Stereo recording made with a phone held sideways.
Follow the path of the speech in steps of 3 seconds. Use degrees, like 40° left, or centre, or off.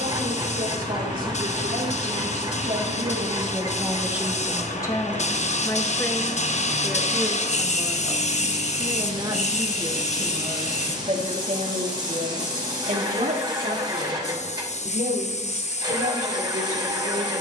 60° right, centre, centre, 40° right, 50° right, 60° right.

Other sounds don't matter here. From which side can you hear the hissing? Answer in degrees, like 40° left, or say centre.
50° left.